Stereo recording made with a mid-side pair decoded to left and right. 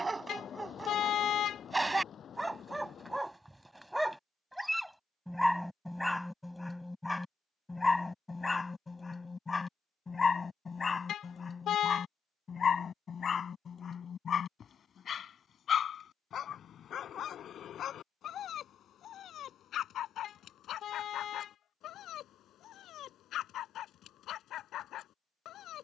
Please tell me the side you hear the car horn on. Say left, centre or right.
left.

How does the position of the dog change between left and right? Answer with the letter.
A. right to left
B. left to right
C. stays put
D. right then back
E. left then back
A.